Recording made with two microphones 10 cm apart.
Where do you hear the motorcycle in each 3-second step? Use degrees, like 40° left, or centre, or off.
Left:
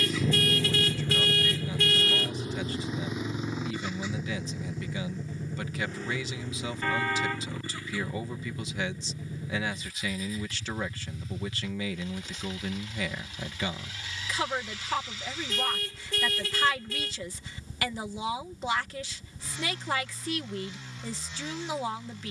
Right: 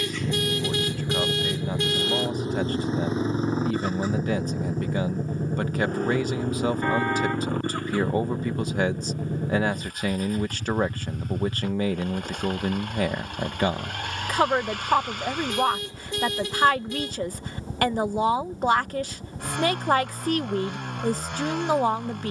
20° right, 40° right, 50° right, 50° right, 60° right, 60° right, 60° right, 60° right.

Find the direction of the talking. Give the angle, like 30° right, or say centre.
50° right.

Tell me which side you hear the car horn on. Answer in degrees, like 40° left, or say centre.
20° right.